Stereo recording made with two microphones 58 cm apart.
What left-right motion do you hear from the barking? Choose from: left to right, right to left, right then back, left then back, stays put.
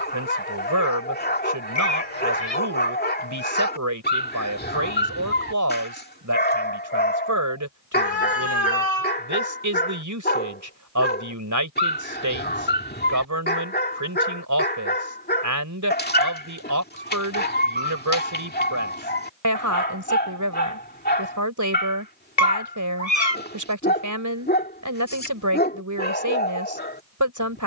stays put.